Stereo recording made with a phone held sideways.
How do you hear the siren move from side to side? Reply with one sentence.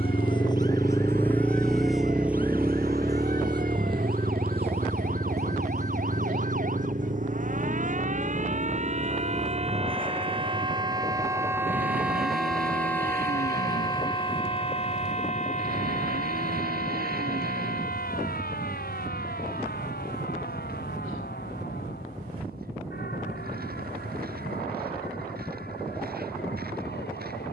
You can hear the siren go from the right side to the left.